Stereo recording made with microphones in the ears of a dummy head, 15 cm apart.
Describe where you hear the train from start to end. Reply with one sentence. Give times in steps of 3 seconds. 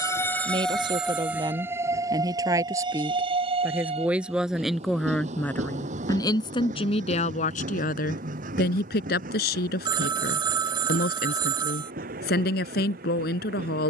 In this clip you hear the train in the centre from 0 s and on the right from 3 s.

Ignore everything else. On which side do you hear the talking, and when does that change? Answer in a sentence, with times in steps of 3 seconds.
In this clip you hear the talking on the right from 0 s, in the centre from 3 s and on the left from 6 s.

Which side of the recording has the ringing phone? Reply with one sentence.
In this clip you hear the ringing phone on the right.